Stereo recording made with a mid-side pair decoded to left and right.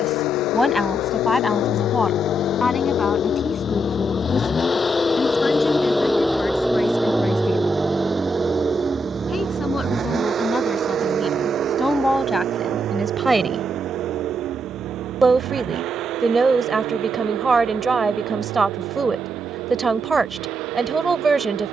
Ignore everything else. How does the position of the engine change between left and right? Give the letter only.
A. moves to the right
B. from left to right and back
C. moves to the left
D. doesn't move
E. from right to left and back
A.